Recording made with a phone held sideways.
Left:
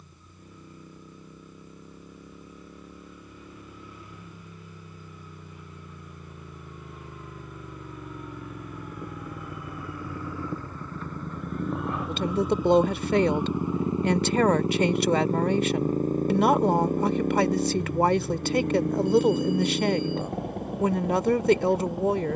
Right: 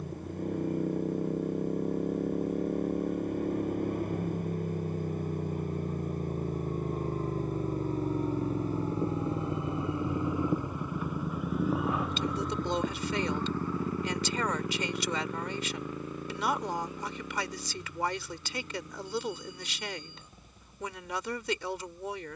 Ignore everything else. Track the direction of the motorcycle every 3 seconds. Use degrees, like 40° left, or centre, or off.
60° right, 50° right, 40° right, 20° right, 20° left, 40° left, 60° left, 70° left.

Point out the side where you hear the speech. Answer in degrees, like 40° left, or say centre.
50° left.